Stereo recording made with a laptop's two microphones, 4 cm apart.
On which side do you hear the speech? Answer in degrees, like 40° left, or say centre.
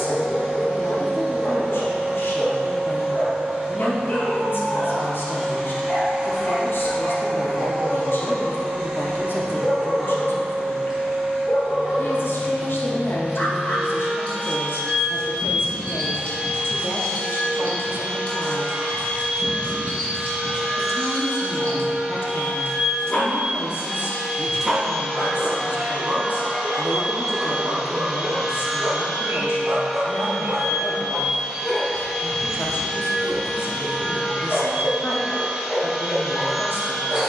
60° left.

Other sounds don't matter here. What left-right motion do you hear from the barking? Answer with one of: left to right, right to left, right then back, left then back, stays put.
right then back.